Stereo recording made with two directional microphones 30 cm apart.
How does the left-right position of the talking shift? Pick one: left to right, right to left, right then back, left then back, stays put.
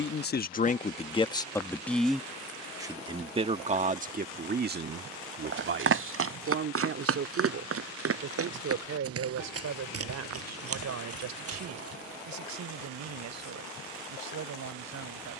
left to right.